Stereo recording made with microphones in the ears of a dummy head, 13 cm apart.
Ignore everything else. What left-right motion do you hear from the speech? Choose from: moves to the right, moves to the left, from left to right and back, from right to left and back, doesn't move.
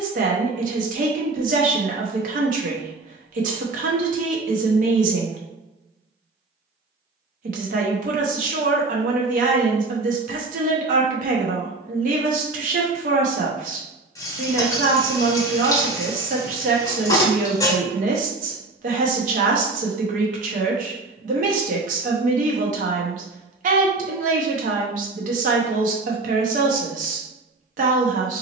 doesn't move.